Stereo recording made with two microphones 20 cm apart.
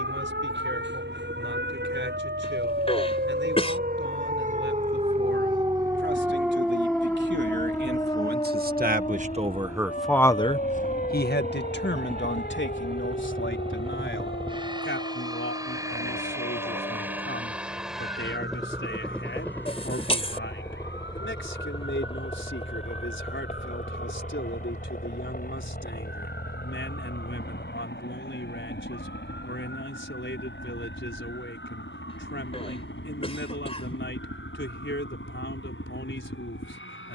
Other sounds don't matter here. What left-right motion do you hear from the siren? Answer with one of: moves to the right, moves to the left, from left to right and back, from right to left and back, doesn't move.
moves to the left.